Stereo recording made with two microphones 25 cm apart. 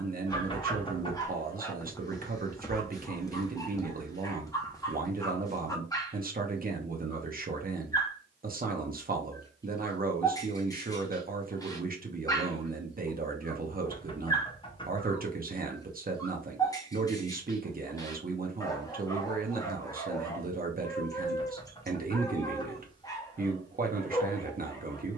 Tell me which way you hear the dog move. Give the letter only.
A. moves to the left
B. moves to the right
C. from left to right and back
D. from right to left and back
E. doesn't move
E.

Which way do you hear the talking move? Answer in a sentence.
You can hear the talking stay put.